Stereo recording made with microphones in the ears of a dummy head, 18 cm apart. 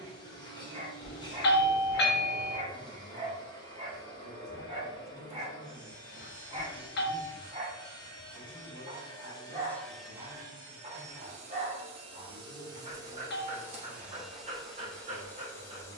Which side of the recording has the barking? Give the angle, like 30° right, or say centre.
30° right.